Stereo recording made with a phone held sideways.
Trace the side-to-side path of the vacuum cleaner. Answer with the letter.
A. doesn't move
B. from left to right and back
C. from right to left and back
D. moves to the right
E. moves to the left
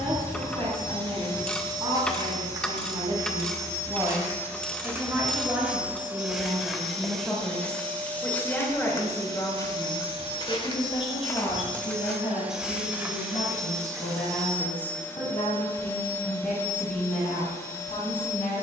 B.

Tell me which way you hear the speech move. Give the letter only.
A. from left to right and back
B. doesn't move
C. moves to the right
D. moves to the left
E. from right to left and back
D.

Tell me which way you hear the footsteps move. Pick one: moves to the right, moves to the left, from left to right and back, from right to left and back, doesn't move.
from right to left and back.